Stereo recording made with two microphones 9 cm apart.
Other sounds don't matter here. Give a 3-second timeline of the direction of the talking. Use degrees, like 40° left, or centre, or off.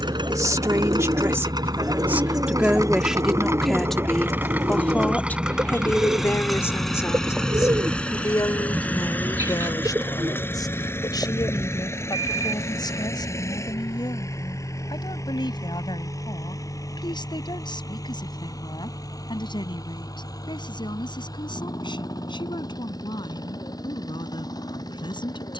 30° right, 10° left, 40° left, 50° left, 60° left, 60° left, 60° left, 60° left, 70° left.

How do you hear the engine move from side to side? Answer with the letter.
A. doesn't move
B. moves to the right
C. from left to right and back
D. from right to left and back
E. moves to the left
E.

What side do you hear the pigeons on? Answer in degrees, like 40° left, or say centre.
40° right.